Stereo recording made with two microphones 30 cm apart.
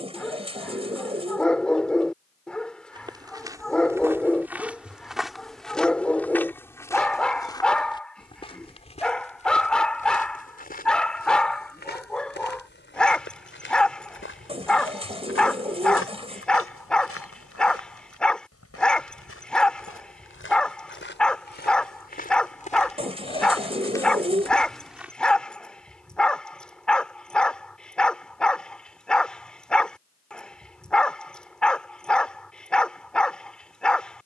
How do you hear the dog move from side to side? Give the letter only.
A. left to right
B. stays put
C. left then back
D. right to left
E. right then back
B.